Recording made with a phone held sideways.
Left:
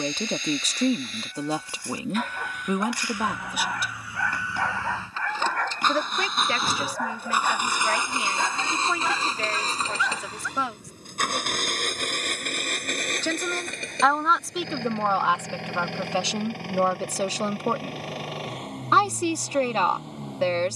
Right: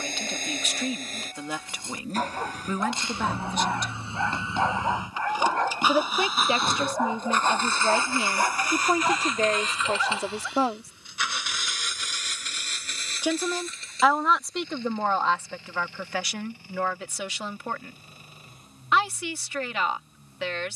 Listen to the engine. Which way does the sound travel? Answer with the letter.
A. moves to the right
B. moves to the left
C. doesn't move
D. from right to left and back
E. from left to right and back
B.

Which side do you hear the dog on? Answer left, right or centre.
right.